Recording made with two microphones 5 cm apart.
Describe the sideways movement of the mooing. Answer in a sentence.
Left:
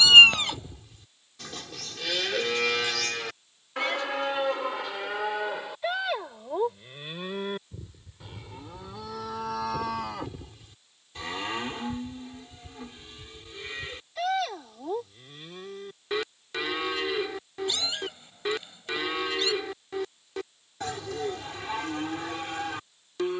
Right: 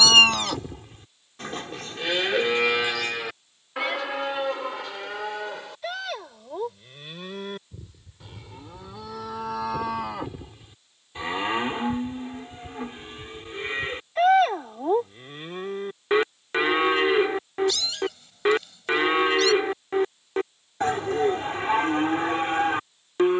In this clip you hear the mooing move from right to left and back again.